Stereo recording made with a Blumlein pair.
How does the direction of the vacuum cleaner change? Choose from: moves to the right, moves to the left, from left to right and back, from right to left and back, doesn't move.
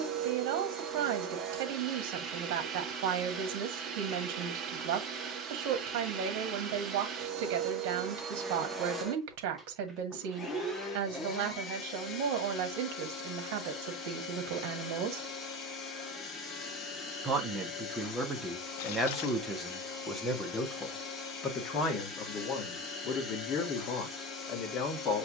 moves to the left.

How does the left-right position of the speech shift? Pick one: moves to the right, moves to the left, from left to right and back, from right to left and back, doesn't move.
moves to the left.